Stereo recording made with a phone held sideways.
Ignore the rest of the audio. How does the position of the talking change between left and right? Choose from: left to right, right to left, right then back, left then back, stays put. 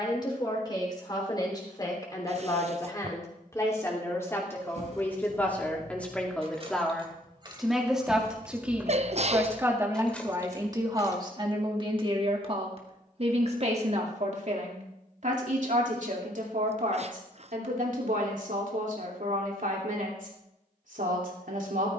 left to right.